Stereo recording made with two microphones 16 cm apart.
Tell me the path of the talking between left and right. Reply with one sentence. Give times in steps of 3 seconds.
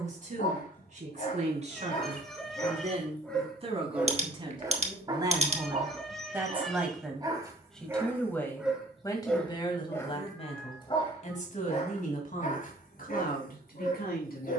You can hear the talking on the right from 0 s, in the centre from 6 s and on the left from 9 s.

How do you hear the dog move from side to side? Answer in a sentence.
You can hear the dog move from left to right and back again.